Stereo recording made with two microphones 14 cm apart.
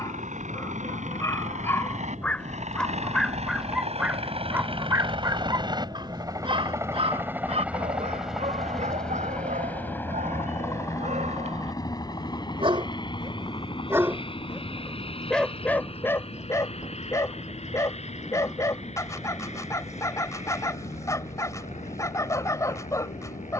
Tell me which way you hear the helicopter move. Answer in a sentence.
You can hear the helicopter travel towards the left.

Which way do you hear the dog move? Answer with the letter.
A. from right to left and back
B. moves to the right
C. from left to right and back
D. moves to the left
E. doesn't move
C.